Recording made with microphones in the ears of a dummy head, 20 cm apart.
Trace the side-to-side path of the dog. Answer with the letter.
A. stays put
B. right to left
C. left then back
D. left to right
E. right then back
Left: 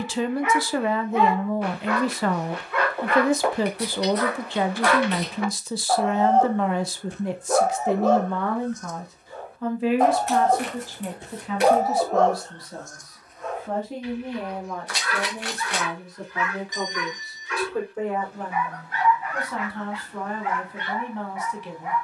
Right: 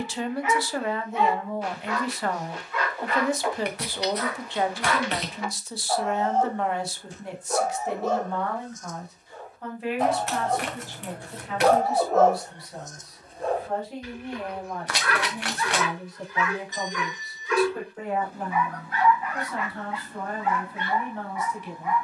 D.